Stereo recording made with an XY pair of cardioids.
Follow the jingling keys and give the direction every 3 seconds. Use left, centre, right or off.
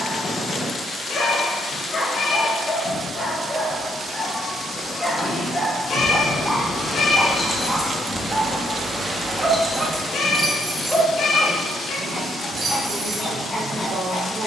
off, left, left, right, right.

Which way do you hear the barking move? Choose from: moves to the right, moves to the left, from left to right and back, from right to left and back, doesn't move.
from left to right and back.